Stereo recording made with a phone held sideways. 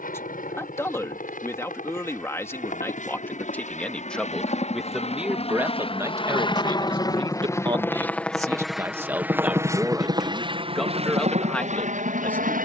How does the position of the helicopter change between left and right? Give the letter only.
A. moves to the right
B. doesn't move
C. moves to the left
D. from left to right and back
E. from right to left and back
A.